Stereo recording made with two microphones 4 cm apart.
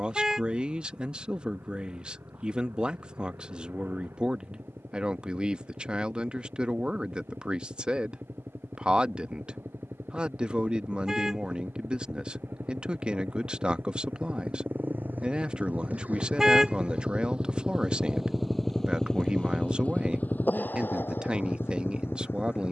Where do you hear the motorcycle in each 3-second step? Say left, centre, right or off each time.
right, right, right, right, right, right, left, left.